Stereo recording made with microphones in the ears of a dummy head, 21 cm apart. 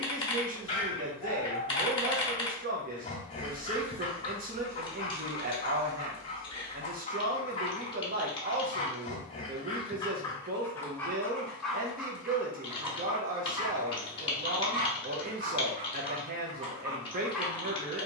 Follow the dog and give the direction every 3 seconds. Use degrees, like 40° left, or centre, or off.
20° left, 20° left, 20° left, 10° left, 20° right, 20° right.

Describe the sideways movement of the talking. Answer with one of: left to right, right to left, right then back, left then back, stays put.
stays put.